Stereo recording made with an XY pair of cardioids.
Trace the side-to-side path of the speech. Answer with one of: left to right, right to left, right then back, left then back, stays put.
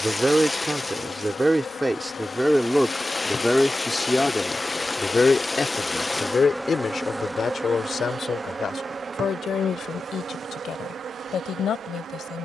right to left.